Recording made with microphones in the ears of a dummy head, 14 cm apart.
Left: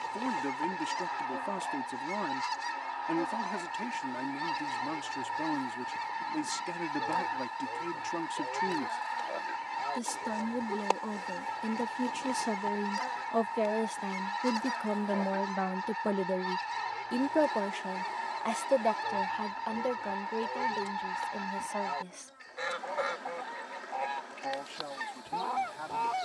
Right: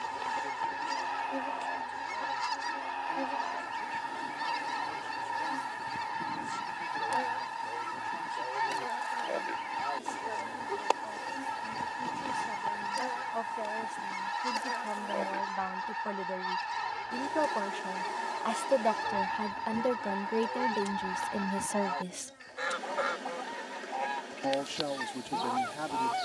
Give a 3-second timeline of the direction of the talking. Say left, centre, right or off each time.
left, left, left, left, left, left, centre, right, right.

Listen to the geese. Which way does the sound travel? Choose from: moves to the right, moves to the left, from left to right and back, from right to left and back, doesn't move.
doesn't move.